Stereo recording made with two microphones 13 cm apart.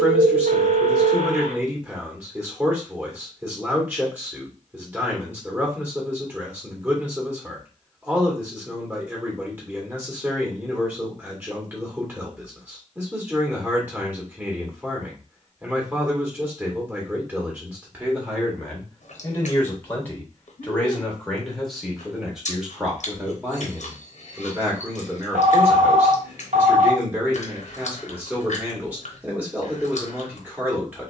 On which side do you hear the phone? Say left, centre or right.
right.